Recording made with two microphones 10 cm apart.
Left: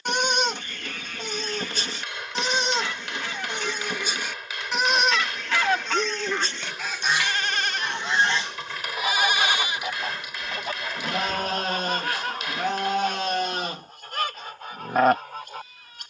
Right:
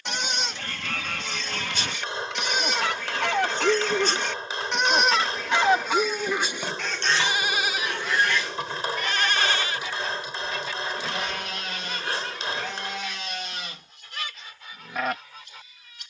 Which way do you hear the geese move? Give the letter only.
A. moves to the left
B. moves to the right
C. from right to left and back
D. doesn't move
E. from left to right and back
A.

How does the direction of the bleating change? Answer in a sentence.
In this clip you hear the bleating go right and come back.